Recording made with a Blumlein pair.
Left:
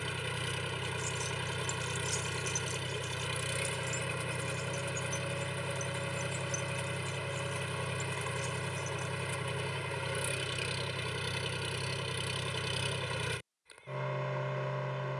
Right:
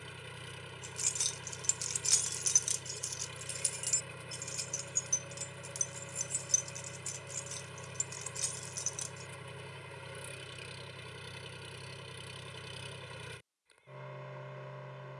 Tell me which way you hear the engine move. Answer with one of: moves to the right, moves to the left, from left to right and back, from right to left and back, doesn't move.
doesn't move.